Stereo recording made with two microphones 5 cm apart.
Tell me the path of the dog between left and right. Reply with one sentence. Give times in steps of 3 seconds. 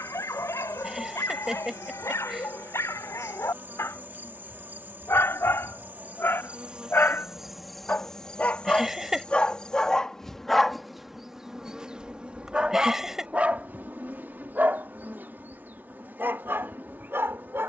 In this clip you hear the dog on the left from 0 s, in the centre from 9 s and on the right from 12 s.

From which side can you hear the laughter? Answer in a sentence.
In this clip you hear the laughter in the centre.